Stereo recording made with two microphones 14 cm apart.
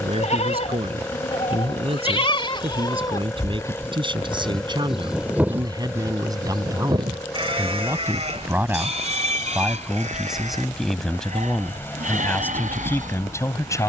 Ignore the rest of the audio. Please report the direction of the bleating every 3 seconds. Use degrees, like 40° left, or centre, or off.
50° left, 10° left, 40° right, 60° right, 70° right.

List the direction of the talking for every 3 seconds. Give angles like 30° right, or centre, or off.
40° right, 30° right, 20° right, centre, 20° left.